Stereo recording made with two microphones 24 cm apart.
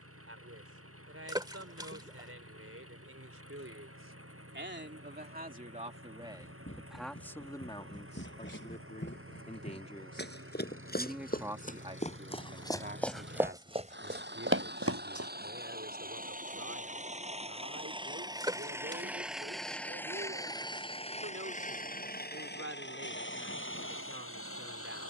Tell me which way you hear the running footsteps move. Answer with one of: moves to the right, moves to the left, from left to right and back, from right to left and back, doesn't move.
moves to the right.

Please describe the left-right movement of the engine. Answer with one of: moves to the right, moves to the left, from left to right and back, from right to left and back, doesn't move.
moves to the left.